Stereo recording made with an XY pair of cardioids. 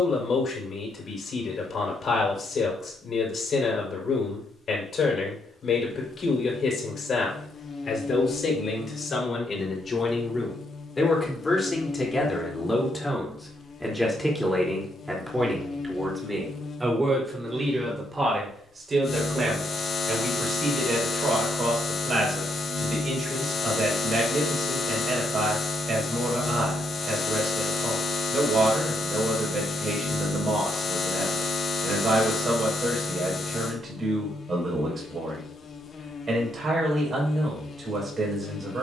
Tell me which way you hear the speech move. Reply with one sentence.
In this clip you hear the speech travel towards the right.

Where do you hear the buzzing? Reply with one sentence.
In this clip you hear the buzzing on the left.